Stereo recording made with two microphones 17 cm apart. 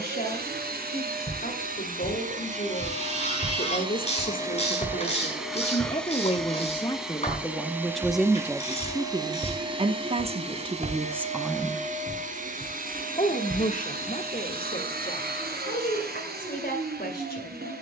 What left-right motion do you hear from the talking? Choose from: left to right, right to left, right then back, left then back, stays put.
right then back.